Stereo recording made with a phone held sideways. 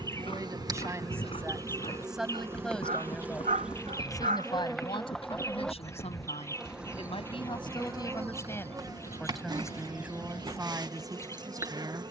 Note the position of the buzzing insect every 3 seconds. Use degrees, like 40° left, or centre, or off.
20° right, centre, 10° right, 30° right.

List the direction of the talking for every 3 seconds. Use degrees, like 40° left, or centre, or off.
10° right, 30° left, 40° left, 20° right.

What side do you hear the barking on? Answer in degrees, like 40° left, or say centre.
80° right.